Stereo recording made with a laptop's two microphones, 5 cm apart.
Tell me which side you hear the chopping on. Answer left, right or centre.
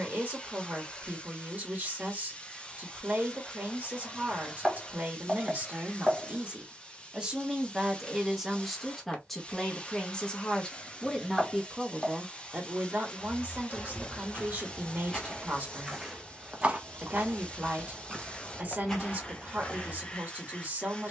centre.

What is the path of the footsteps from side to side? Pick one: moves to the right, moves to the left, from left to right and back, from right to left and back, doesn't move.
from left to right and back.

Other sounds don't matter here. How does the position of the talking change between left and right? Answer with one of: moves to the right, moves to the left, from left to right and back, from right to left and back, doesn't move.
from right to left and back.